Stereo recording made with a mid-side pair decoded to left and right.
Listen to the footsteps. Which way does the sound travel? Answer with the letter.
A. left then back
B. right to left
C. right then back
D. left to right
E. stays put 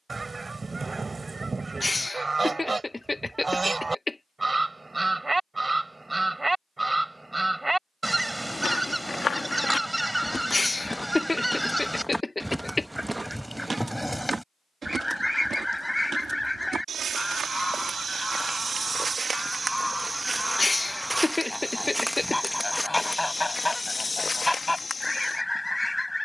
C.